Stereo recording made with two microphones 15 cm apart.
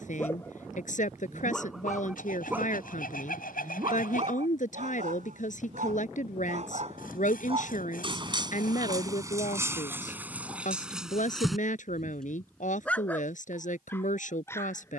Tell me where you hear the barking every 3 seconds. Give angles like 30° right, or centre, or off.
centre, 50° right, 40° right, 10° right, 10° left.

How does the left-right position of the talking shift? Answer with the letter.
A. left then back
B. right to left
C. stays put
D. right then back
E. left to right
C.